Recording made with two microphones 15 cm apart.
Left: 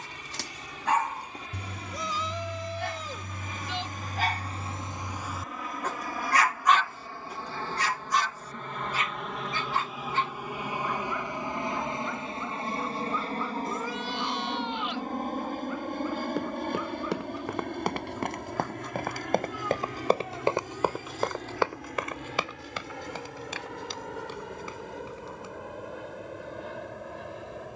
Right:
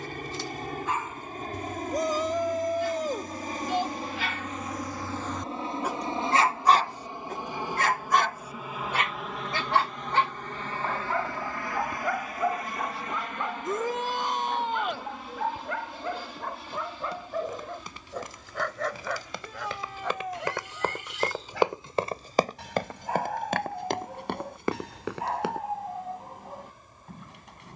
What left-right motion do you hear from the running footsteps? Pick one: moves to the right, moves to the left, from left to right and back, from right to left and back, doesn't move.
moves to the right.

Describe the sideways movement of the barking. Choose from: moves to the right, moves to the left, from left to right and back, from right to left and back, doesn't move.
moves to the right.